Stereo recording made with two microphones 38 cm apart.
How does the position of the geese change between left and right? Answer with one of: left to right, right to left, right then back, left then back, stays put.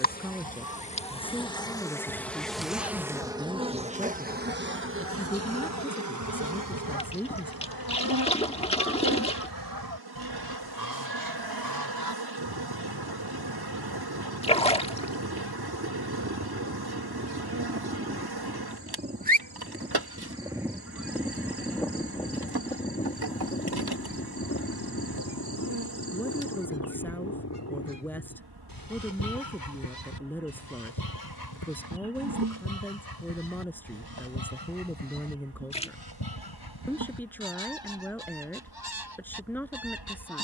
right to left.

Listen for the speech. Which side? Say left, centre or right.
centre.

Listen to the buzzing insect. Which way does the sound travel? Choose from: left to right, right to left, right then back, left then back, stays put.
left to right.